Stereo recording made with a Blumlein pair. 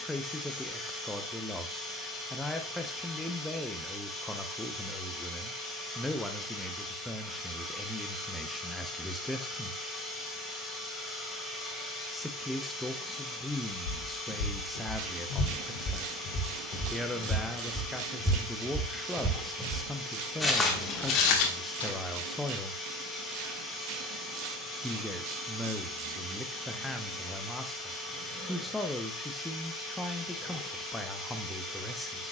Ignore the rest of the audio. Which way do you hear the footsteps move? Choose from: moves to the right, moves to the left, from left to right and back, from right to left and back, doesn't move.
from left to right and back.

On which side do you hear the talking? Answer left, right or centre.
centre.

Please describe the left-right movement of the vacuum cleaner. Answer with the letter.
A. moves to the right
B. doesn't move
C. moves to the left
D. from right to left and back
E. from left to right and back
B.